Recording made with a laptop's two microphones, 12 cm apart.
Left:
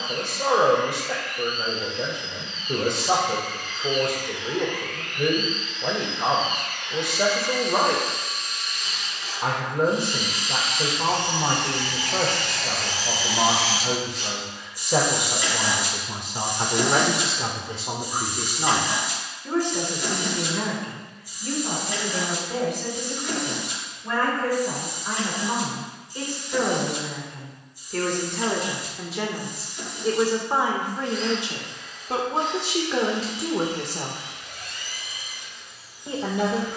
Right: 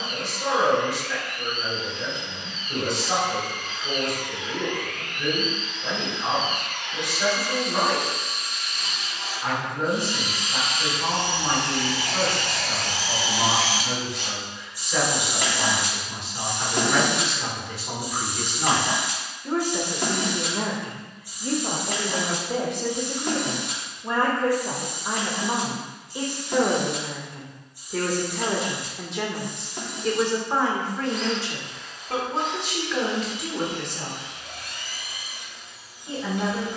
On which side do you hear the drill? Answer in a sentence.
In this clip you hear the drill on the right.